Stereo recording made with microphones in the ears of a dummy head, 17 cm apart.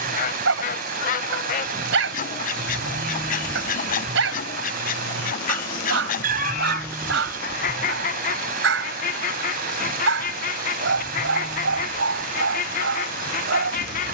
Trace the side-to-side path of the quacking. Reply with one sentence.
In this clip you hear the quacking stay put.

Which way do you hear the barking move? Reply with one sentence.
You can hear the barking stay in one place.